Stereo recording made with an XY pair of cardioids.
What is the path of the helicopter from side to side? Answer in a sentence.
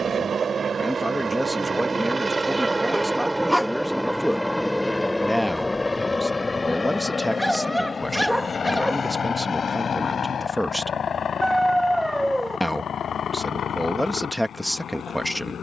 You can hear the helicopter move to the left.